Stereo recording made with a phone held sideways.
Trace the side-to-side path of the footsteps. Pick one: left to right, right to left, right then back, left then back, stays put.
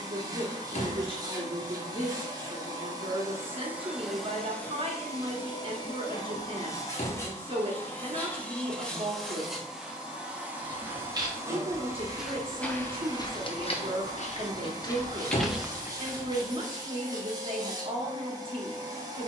left then back.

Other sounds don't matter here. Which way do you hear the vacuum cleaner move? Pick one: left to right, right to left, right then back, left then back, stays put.
left then back.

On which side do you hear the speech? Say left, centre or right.
right.